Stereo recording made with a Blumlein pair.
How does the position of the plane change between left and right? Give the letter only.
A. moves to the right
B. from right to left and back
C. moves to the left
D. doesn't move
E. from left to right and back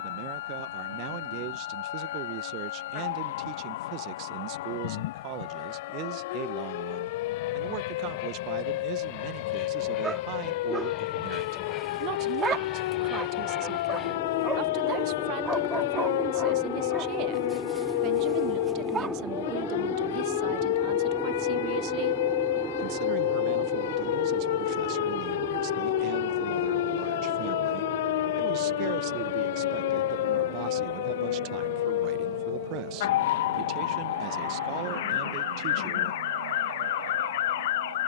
A.